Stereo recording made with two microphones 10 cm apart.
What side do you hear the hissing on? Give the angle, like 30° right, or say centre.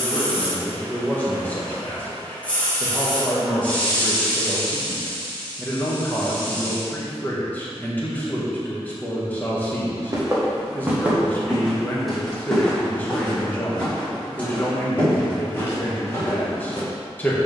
10° left.